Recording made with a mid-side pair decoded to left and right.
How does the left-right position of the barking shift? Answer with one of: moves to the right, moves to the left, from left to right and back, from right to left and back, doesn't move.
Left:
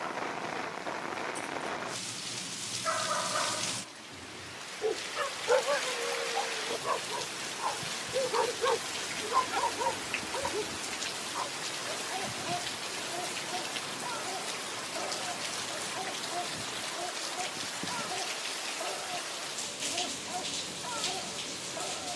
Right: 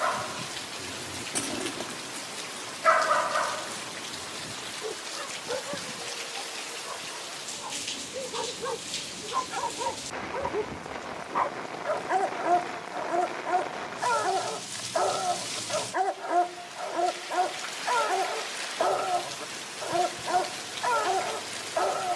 from right to left and back.